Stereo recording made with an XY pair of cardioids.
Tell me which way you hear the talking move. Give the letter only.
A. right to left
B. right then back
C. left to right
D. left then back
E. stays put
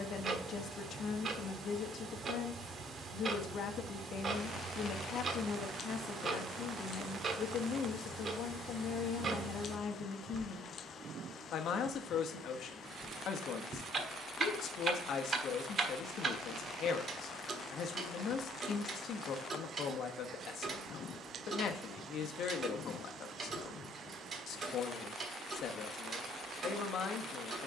E.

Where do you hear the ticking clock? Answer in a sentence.
In this clip you hear the ticking clock on the right.